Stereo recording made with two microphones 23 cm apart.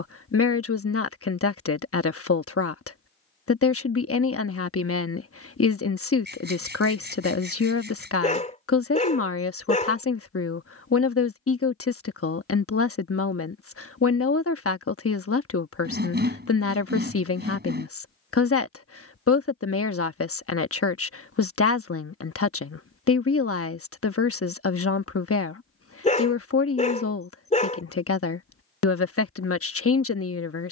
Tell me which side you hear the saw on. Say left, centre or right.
right.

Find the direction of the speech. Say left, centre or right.
left.